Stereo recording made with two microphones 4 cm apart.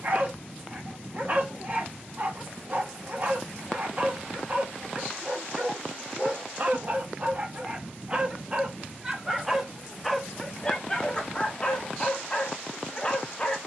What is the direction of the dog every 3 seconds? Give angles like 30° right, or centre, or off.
50° right, 50° right, 30° right, 10° left, 20° left.